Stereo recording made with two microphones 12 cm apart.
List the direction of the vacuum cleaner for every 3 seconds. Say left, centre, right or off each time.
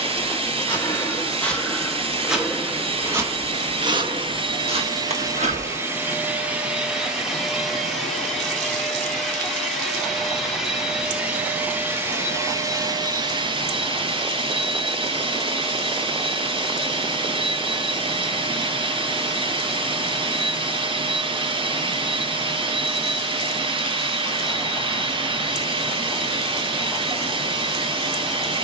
right, right, centre, centre, right, right, right, right, right, right.